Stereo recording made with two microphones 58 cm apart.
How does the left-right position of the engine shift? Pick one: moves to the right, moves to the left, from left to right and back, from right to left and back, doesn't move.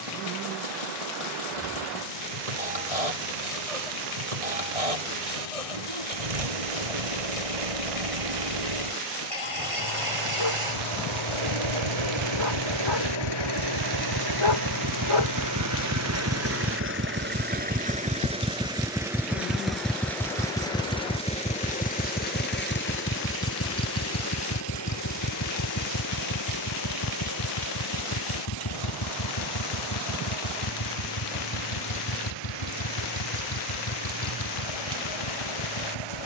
moves to the left.